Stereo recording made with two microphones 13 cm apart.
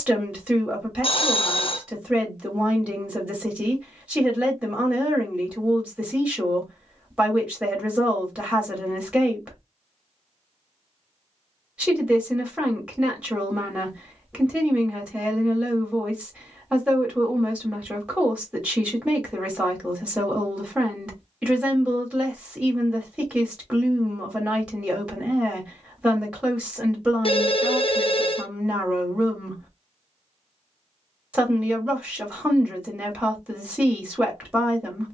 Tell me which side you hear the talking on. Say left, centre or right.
centre.